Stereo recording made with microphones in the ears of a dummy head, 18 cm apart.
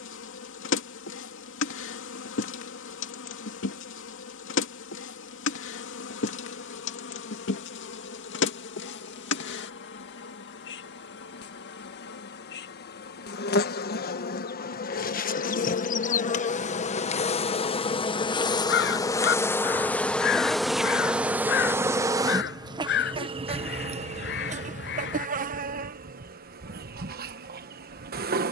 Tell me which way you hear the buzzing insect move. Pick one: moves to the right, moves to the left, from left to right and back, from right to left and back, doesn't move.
moves to the right.